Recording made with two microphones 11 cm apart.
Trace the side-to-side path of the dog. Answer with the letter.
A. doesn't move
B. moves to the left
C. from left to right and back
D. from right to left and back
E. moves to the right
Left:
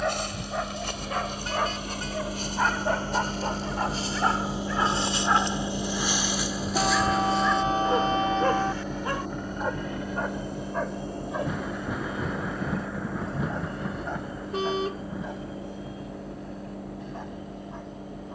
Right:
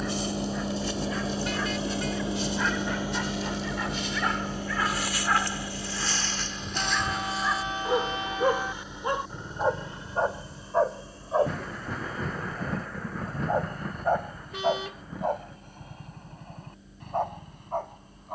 E.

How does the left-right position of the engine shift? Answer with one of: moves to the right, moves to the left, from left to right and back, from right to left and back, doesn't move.
moves to the left.